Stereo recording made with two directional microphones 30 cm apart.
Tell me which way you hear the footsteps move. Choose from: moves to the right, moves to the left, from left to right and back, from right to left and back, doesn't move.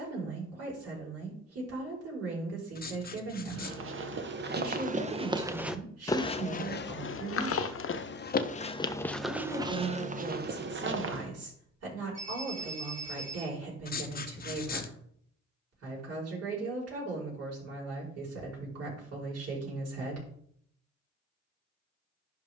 from right to left and back.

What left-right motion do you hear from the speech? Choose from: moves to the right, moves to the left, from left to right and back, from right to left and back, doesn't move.
doesn't move.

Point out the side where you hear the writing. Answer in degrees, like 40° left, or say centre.
30° left.